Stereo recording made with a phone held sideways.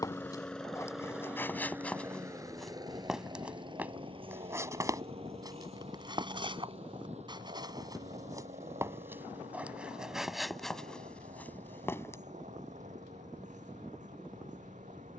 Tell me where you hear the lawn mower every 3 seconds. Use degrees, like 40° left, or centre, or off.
10° right, 40° right, 50° right, 60° right, 60° right.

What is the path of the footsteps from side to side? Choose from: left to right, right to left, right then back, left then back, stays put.
right then back.